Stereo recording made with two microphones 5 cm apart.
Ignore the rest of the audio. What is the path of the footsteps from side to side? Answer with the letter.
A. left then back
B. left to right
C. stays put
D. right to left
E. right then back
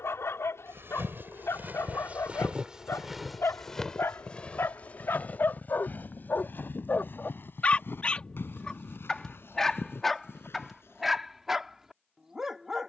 D.